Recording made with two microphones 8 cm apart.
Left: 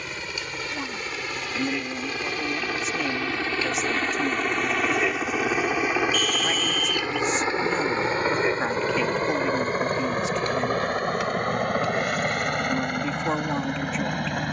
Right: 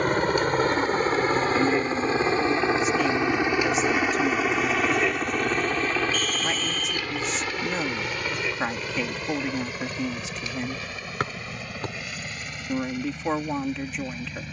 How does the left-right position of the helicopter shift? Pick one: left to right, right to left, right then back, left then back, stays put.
right to left.